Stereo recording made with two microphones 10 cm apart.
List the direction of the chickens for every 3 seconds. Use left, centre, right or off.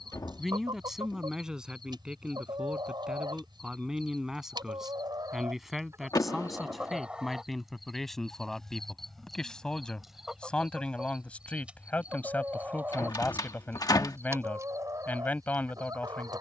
right, right, centre, centre, right, right.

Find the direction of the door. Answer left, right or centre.
left.